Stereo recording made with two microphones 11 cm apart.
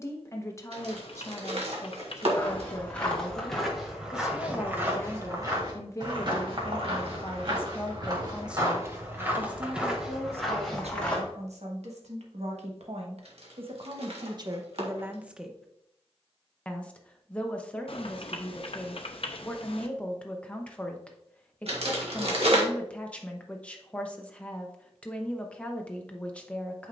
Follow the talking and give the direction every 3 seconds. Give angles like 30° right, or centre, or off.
30° left, 30° left, 10° left, 70° right, 60° right, centre, 10° left, 10° left, 10° left.